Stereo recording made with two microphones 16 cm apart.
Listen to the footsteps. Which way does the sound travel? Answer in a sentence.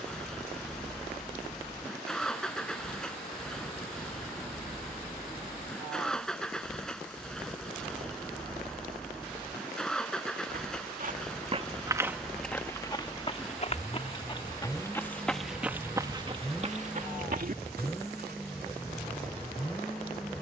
You can hear the footsteps move from right to left and back again.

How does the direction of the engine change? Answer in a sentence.
In this clip you hear the engine stay put.